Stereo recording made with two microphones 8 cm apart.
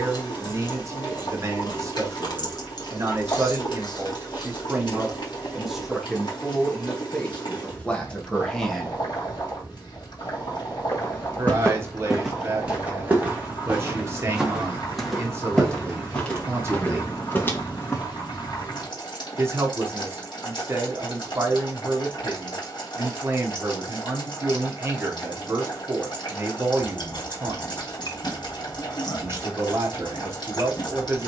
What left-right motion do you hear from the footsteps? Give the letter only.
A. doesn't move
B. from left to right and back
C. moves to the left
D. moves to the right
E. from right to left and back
B.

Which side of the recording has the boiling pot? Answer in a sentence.
You can hear the boiling pot on the left.